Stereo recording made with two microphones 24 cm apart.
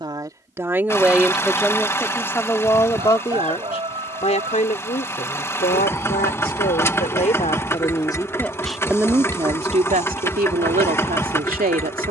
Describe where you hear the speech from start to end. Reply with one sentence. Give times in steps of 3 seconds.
You can hear the speech in the centre from 0 s, on the left from 3 s and on the right from 9 s.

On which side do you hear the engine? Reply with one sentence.
In this clip you hear the engine in the centre.